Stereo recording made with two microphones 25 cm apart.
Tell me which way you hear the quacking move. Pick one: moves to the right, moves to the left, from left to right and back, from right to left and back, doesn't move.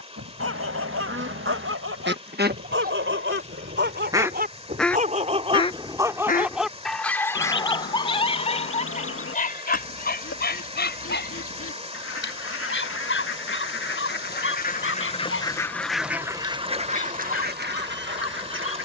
from right to left and back.